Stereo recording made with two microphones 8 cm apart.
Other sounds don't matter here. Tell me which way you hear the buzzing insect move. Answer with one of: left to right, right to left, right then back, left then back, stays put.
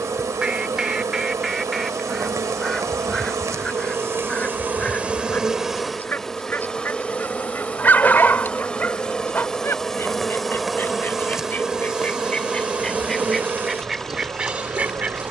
left then back.